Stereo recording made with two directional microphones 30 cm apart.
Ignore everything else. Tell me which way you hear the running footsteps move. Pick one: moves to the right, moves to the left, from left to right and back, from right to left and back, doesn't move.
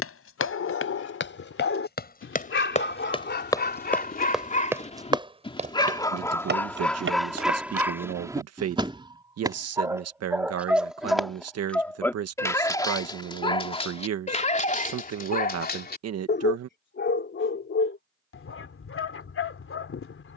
moves to the right.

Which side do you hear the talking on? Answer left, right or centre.
right.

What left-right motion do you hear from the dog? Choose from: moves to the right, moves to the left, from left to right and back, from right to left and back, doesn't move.
from left to right and back.